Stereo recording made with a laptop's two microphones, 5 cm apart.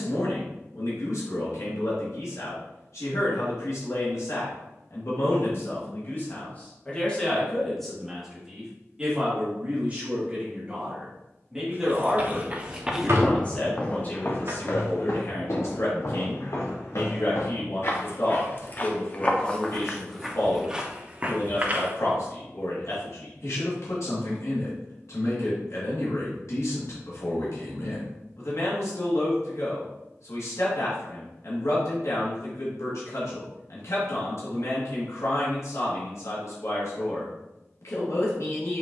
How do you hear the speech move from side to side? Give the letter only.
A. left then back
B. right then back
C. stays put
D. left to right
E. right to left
B.